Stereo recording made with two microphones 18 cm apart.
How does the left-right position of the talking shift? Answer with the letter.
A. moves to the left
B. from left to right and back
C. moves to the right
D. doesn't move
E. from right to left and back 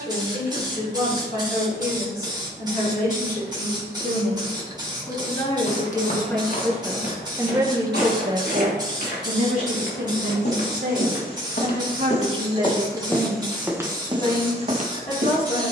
B.